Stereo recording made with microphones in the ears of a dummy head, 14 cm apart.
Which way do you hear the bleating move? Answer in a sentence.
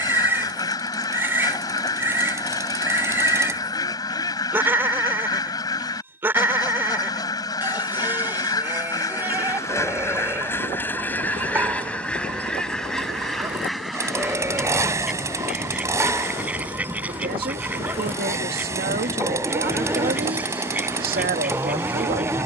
You can hear the bleating stay in one place.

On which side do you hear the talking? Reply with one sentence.
In this clip you hear the talking on the right.